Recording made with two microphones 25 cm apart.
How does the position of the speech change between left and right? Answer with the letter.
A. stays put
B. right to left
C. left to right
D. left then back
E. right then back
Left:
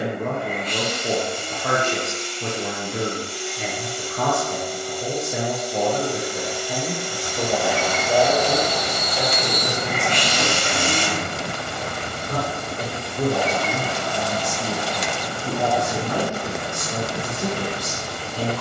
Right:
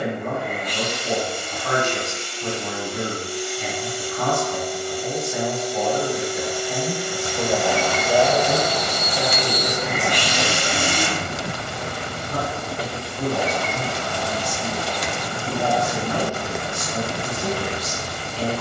E.